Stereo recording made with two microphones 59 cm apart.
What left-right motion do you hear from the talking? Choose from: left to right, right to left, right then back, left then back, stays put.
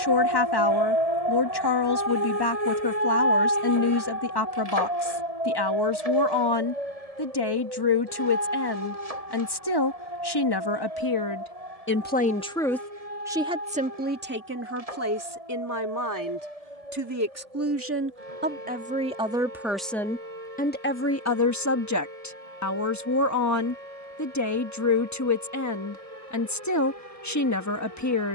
right then back.